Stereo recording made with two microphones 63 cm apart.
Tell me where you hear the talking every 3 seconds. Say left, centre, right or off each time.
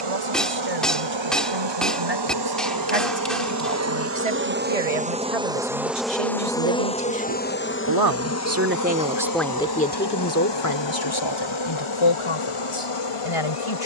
right, right, right, left, left.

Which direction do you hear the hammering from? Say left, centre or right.
centre.